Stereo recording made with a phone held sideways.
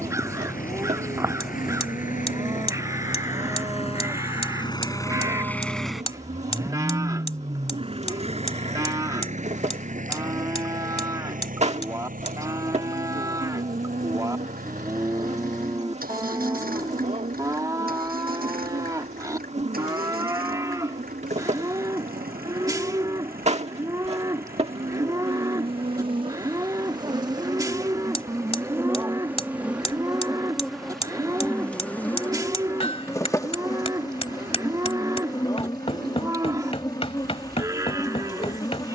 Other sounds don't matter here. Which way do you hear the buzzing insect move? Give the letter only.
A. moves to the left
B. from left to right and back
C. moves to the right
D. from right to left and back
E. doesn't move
A.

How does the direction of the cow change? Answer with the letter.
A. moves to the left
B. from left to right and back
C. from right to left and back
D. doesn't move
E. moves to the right
D.